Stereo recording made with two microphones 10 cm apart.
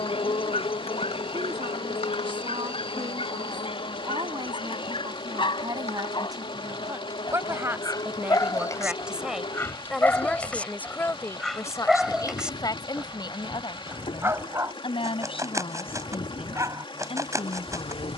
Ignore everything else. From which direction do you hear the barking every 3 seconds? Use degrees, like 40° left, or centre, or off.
60° left, 60° left, 40° left, 10° left, 20° right, 30° right.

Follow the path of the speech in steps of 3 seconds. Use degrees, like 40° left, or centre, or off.
60° right, 40° right, 30° right, 10° left, 50° left, 70° left.